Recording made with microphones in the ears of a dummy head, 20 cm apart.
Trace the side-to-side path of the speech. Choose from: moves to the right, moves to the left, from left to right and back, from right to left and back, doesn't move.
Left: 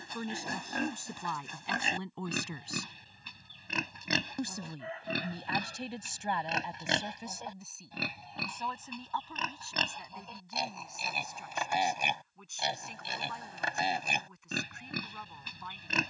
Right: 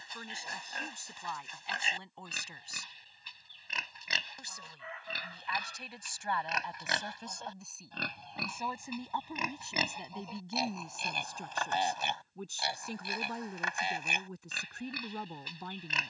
moves to the right.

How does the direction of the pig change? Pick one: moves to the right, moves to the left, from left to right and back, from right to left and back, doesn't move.
from left to right and back.